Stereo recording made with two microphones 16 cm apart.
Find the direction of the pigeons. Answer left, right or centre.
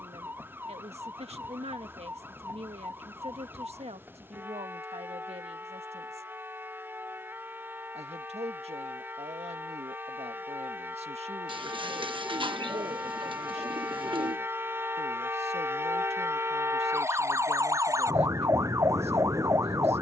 right.